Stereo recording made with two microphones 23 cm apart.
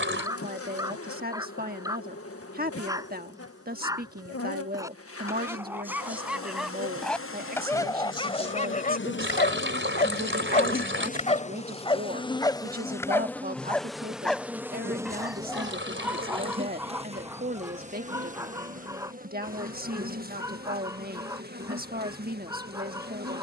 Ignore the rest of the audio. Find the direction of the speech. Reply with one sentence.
In this clip you hear the speech on the right.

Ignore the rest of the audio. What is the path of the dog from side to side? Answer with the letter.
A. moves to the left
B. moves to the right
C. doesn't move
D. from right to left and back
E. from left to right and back
D.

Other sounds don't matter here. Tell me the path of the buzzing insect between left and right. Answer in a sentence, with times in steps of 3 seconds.
In this clip you hear the buzzing insect on the left from 0 s, in the centre from 12 s and on the right from 15 s.